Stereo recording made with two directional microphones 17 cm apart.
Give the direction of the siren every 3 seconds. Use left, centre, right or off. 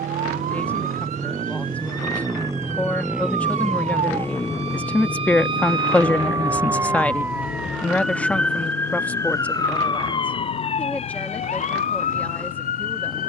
right, right, centre, left, left.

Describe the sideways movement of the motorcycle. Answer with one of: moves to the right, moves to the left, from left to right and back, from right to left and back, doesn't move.
moves to the left.